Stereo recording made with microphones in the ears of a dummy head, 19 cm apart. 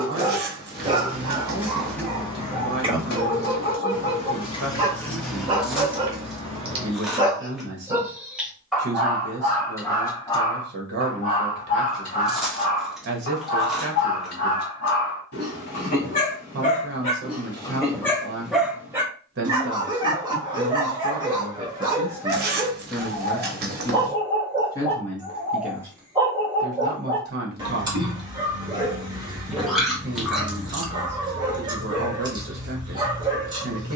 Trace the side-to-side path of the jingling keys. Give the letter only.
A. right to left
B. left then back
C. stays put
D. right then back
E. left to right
B.